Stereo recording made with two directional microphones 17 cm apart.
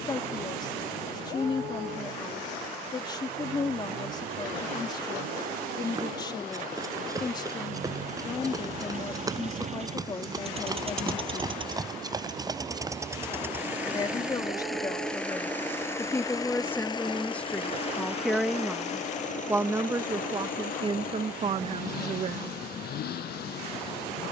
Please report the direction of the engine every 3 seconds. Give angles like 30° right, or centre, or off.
60° right, 60° right, 50° right, 40° right, 10° right, 20° left, 50° left, 60° left.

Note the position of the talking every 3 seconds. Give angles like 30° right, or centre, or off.
30° left, 30° left, 30° left, 30° left, 20° left, 10° left, 10° right, 40° right.